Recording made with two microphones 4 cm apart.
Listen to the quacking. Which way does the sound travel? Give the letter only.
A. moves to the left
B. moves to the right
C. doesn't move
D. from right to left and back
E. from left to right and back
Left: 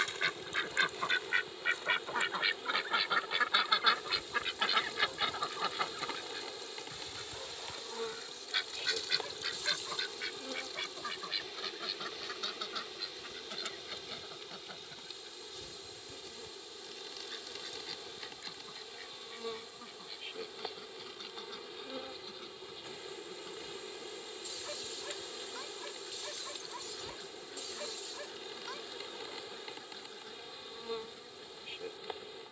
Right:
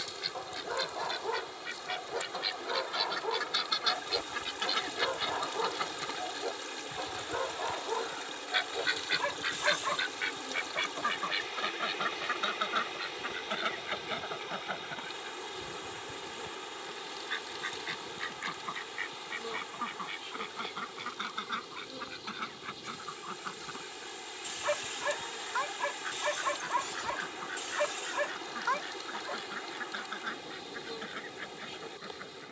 B.